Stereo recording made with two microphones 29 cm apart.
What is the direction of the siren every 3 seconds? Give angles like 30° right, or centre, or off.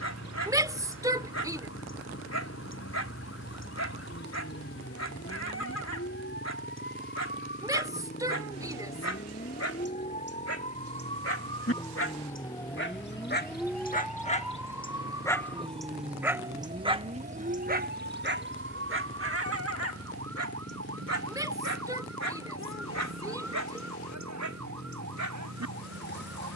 50° left, 50° left, 40° left, 20° left, centre, 20° right, 50° right, 60° right, 70° right.